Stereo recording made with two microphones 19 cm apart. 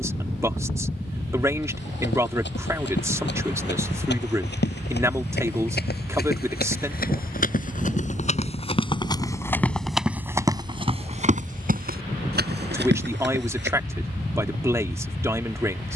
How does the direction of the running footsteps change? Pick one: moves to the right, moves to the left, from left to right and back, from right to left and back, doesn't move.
moves to the right.